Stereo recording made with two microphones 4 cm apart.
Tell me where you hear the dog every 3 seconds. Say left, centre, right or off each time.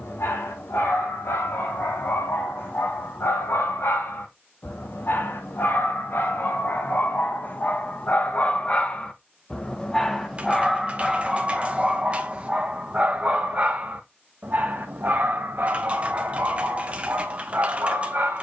left, left, left, centre, right, right.